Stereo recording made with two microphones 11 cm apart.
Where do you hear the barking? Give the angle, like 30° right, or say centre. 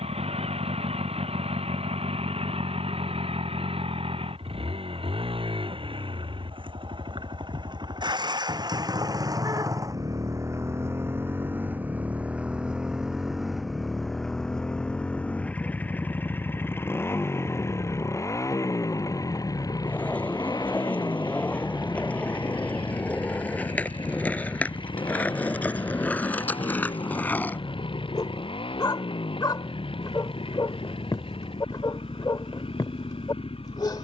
40° left.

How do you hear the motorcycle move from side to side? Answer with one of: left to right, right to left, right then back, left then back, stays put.
right to left.